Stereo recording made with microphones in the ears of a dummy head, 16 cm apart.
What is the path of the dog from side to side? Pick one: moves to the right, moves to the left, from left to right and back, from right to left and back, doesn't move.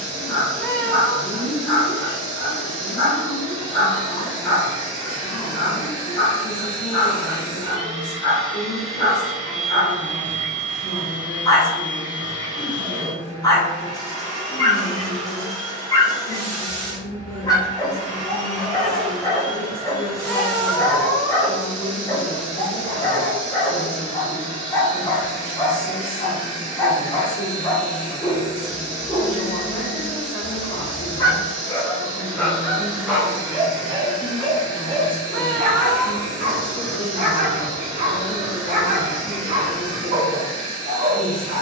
moves to the right.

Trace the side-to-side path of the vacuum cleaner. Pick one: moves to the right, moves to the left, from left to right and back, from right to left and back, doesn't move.
doesn't move.